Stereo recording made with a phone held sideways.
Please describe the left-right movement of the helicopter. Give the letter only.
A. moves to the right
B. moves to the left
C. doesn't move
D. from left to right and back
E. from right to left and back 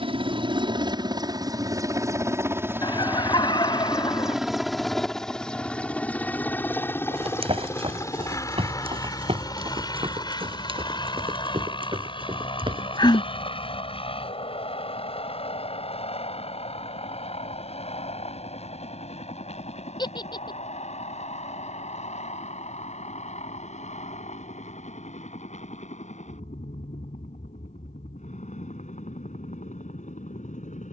B.